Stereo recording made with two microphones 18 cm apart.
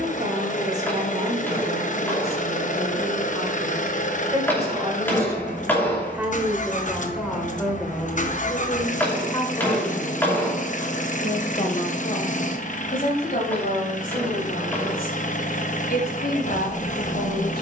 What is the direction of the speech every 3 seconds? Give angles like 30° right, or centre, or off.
40° right, 20° right, centre, 30° left, 50° left, 60° left.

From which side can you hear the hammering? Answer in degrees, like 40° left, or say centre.
10° left.